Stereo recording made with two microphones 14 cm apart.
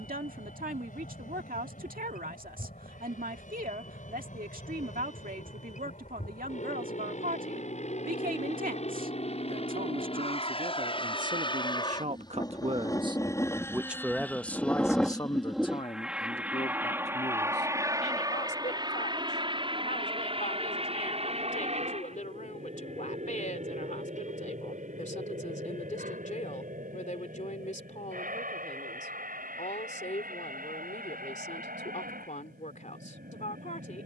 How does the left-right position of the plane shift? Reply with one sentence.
In this clip you hear the plane move to the right.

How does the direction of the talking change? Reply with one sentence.
In this clip you hear the talking move from right to left.